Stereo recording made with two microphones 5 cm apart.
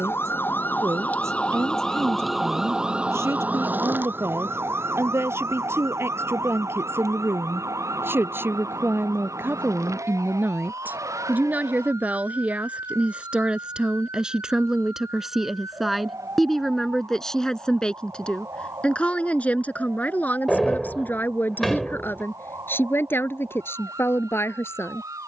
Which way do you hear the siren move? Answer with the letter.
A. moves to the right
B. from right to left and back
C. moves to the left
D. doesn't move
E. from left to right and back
A.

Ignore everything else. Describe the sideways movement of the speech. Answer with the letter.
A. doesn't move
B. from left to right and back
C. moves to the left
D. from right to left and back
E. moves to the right
C.